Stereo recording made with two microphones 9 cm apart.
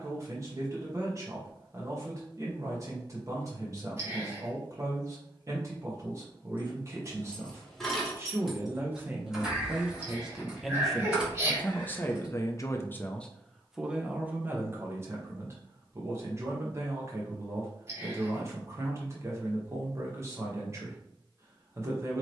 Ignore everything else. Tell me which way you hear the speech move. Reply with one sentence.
In this clip you hear the speech move from right to left and back again.